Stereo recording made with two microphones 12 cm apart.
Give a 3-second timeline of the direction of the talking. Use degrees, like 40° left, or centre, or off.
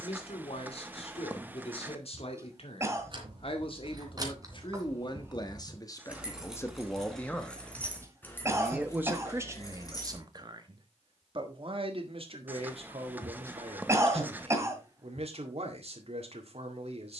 60° left, 40° left, 10° left, 30° right, 60° right, 60° right.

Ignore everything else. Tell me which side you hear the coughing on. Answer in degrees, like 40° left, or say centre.
20° right.